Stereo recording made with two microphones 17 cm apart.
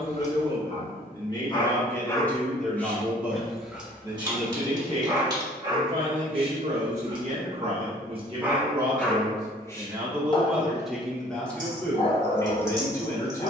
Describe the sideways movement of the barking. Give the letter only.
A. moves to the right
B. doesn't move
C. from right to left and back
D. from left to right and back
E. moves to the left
D.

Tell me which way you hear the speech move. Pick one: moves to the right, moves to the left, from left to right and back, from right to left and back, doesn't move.
from left to right and back.